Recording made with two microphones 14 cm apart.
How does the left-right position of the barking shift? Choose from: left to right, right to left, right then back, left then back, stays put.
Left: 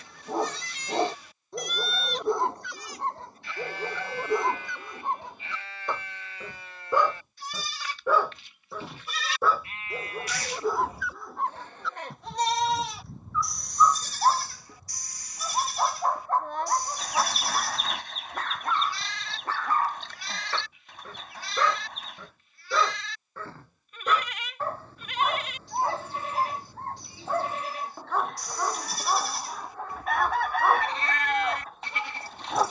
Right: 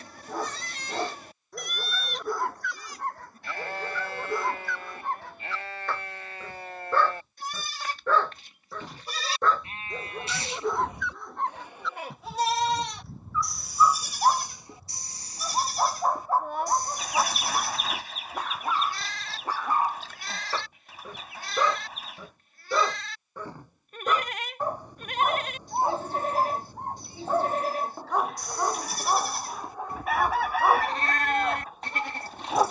left to right.